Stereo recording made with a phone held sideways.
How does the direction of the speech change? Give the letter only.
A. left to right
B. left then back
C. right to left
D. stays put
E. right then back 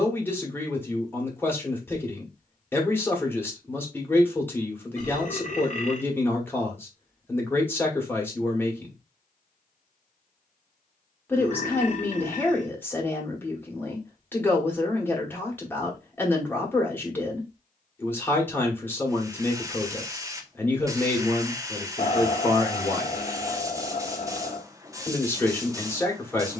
D.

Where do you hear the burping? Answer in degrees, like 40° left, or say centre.
50° left.